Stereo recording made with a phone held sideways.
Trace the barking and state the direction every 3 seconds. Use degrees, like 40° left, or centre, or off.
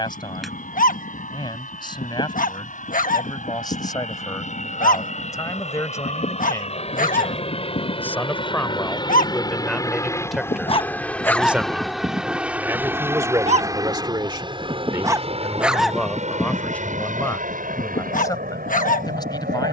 60° left, 60° left, 60° left, 30° left, 40° right, 20° left, 50° left.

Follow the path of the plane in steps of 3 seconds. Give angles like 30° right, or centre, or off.
60° left, 50° left, 40° left, 10° left, 20° right, 40° right, 60° right.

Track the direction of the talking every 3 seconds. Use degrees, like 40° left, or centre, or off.
30° left, 20° left, 10° left, centre, 20° right, 10° left, 20° left.